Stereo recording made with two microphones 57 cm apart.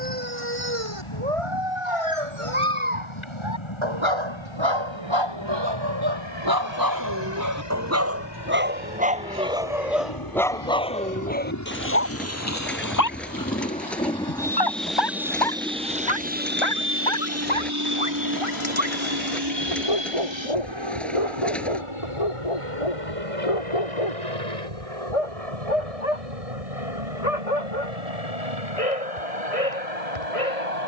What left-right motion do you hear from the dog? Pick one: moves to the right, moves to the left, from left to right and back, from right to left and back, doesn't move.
moves to the left.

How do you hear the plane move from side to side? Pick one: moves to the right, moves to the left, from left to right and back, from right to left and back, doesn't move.
moves to the right.